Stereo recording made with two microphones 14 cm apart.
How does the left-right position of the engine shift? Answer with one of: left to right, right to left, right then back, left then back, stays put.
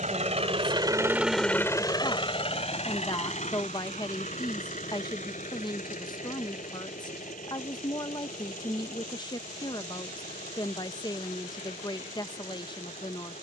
right to left.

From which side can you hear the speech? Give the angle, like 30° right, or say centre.
30° left.